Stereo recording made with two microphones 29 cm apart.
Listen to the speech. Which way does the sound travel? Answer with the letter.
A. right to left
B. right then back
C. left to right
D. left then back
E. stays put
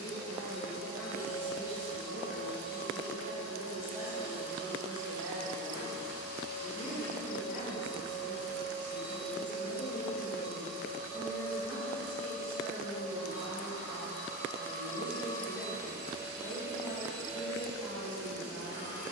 E.